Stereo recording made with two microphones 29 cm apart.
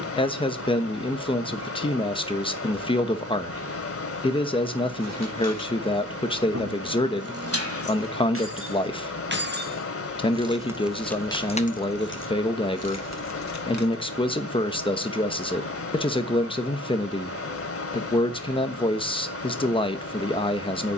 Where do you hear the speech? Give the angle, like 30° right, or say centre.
20° left.